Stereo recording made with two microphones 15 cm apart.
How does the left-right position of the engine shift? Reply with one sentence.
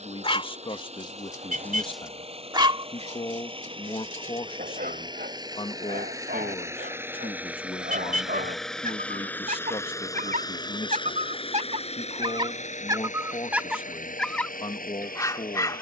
You can hear the engine go from the right side to the left.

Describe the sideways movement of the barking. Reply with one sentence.
You can hear the barking go right and come back.